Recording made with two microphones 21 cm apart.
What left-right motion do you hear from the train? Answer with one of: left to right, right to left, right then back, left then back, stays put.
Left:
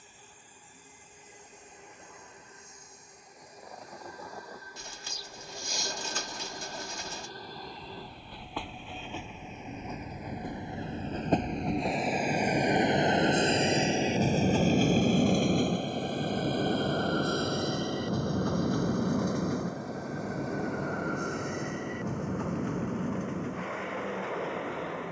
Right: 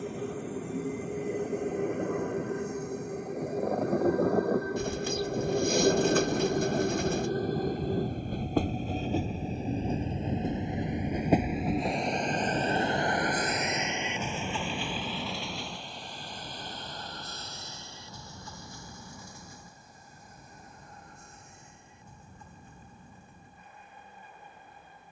right to left.